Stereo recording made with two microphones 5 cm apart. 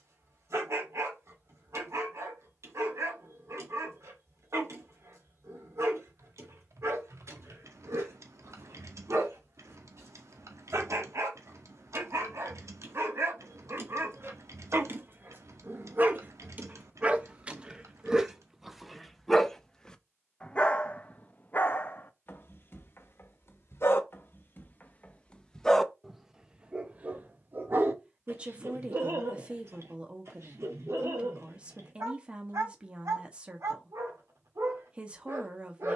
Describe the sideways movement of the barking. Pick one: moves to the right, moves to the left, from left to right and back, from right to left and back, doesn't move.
from right to left and back.